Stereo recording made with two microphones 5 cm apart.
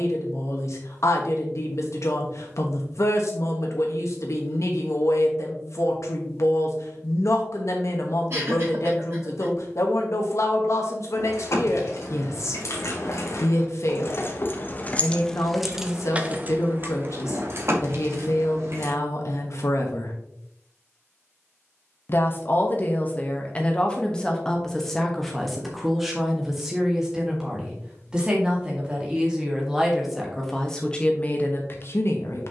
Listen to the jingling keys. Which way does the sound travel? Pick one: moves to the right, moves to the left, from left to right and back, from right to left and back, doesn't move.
moves to the right.